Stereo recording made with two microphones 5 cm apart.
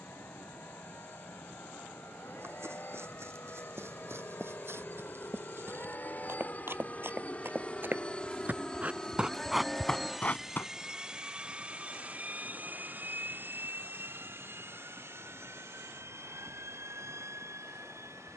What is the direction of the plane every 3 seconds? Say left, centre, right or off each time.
left, left, left, centre, right, right.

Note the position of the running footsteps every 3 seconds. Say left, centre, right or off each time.
right, right, right, centre, off, off.